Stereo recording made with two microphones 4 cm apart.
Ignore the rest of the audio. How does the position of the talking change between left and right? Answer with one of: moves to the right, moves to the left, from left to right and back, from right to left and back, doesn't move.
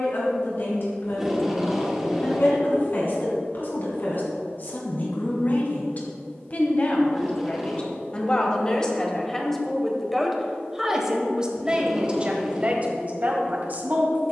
moves to the right.